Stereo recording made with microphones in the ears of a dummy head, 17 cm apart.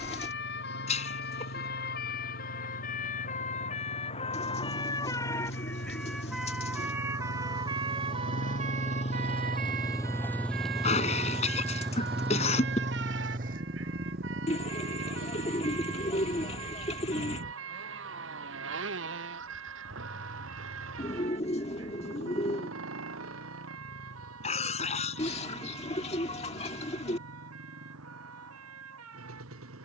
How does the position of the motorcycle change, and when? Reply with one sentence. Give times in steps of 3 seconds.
In this clip you hear the motorcycle on the left from 0 s, in the centre from 9 s and on the right from 12 s.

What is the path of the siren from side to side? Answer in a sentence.
You can hear the siren travel towards the right.